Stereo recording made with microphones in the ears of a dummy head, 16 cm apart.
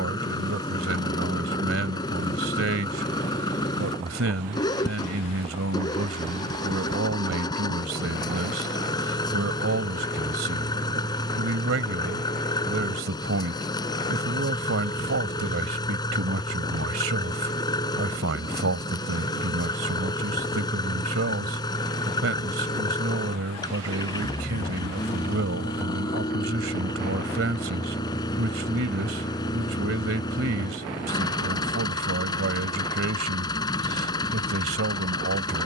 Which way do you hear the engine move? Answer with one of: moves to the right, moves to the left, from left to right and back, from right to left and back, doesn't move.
doesn't move.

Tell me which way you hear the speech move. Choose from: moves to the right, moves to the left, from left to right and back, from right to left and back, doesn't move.
doesn't move.